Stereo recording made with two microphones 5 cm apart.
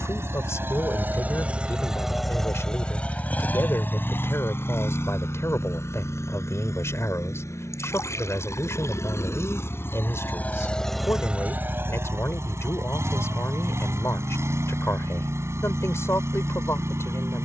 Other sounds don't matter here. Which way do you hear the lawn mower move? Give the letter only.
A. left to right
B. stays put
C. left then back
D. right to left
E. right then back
C.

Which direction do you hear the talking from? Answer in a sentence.
In this clip you hear the talking on the left.